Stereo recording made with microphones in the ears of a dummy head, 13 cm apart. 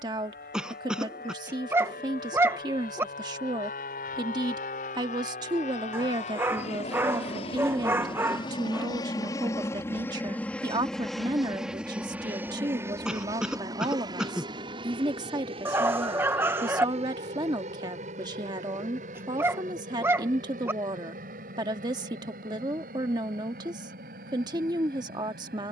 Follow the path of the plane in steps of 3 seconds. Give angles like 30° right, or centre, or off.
70° left, 60° left, 40° left, 10° left, 20° right, 40° right, 50° right, 60° right, 60° right.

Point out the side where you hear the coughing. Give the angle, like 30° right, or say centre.
10° right.